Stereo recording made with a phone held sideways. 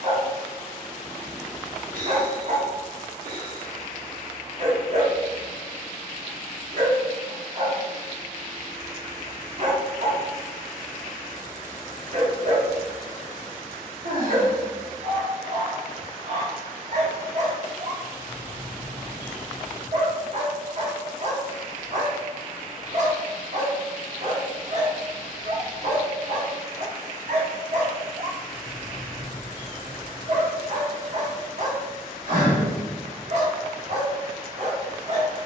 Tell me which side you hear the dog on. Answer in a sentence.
In this clip you hear the dog on the right.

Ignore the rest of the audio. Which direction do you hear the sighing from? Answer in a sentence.
You can hear the sighing on the right.